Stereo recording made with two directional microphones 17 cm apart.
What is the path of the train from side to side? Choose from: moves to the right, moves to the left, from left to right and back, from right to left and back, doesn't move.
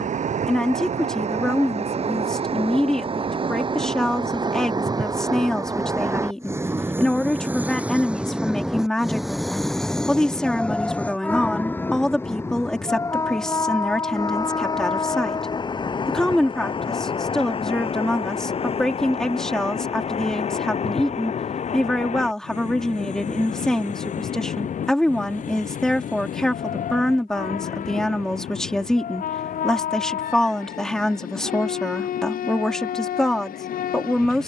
moves to the left.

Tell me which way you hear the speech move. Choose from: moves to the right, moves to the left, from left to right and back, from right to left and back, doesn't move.
doesn't move.